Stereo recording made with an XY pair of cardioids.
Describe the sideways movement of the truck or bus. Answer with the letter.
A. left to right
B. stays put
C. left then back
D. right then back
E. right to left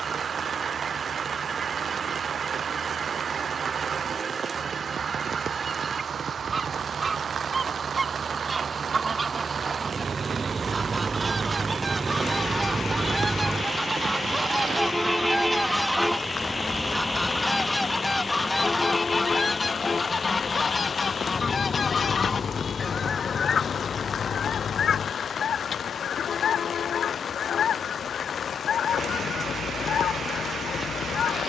E.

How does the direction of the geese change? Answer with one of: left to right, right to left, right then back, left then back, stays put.
right to left.